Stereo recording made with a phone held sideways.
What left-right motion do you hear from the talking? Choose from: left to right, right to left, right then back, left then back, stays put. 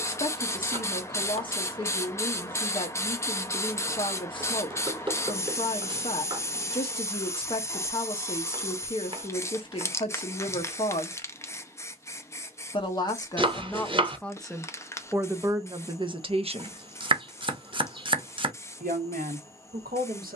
left to right.